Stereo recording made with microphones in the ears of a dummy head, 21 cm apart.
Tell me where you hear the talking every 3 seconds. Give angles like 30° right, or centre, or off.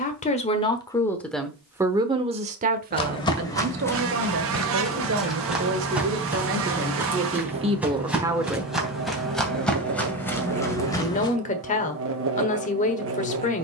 centre, 50° right, 30° right, 30° left, 30° left.